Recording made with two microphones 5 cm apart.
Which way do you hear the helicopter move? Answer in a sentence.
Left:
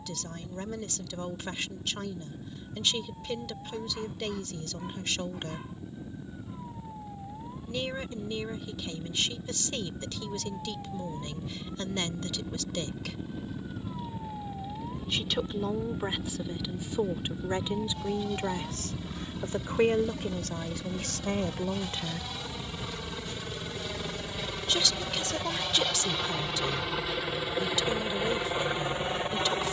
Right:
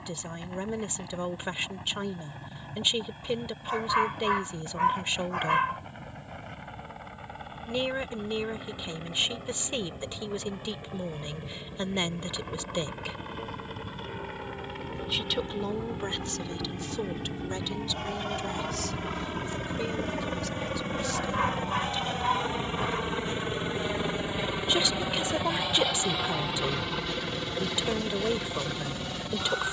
You can hear the helicopter move to the left.